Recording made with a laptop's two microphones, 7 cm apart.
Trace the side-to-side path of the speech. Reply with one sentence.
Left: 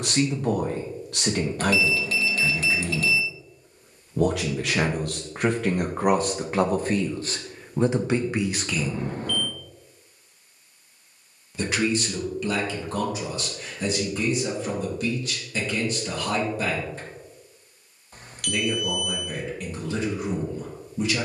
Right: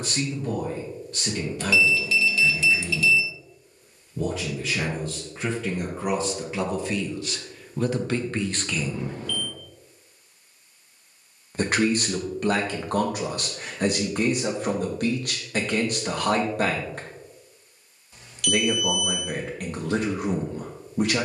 In this clip you hear the speech move from left to right.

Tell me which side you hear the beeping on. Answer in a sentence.
In this clip you hear the beeping on the left.